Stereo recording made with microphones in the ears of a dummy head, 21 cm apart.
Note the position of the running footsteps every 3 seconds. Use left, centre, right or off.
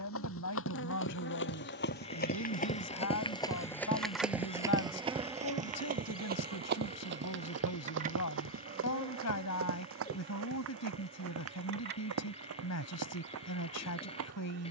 left, centre, right, right, right.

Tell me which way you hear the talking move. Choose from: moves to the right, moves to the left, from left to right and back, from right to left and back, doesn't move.
doesn't move.